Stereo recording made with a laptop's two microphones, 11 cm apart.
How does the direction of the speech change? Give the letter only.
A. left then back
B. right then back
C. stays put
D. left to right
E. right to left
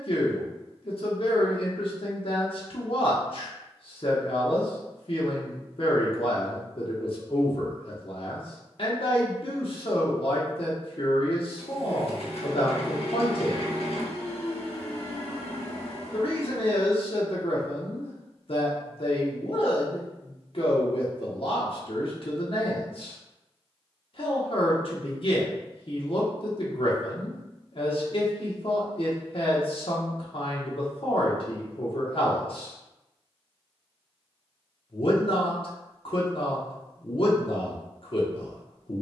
C.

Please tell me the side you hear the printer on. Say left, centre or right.
left.